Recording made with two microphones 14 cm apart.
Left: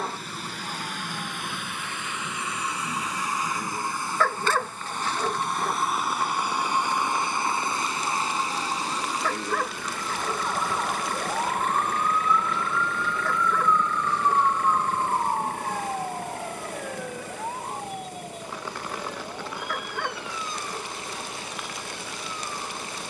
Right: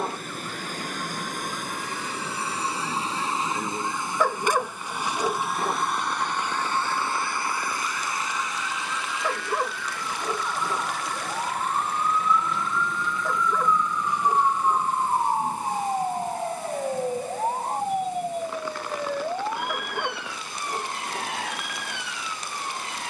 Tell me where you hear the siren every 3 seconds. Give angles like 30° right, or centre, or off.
50° left, 40° left, 30° left, 20° left, centre, 30° right, 60° right, 70° right.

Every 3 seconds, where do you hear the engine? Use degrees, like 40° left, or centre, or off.
40° right, 10° right, 20° left, 50° left, 60° left, 70° left, 70° left, 80° left.